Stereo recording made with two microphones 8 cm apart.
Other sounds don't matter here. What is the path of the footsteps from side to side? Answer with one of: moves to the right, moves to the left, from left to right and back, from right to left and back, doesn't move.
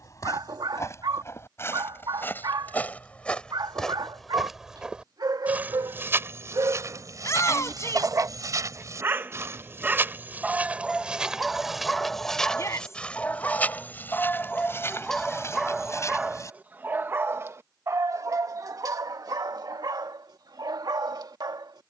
from left to right and back.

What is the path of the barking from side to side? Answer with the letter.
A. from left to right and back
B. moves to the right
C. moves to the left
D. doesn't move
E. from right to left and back
E.